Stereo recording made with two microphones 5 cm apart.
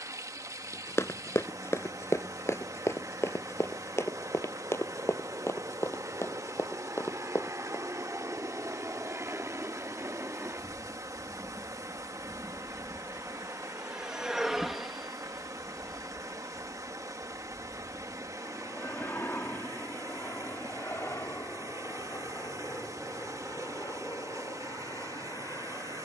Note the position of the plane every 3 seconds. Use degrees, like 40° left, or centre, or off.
70° right, 70° right, 60° right, 40° right, 20° right, 10° left, 30° left, 50° left, 60° left.